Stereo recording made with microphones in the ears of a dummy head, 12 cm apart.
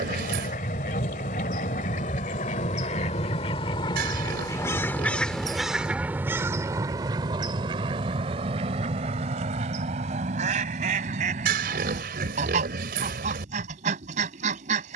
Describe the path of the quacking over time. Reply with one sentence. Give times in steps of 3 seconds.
In this clip you hear the quacking on the left from 0 s and on the right from 6 s.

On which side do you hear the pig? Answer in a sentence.
In this clip you hear the pig on the right.